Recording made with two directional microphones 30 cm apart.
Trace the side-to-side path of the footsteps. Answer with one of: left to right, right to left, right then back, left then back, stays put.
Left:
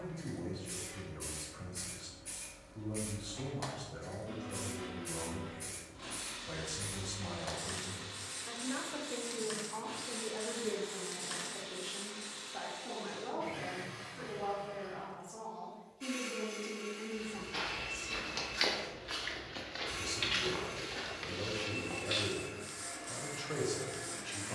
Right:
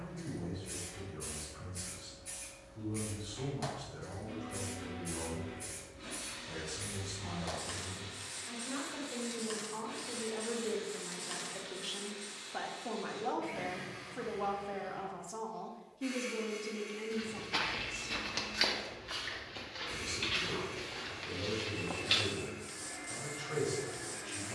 left then back.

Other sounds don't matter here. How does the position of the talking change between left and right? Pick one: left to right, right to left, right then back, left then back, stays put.
right then back.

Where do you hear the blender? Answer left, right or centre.
left.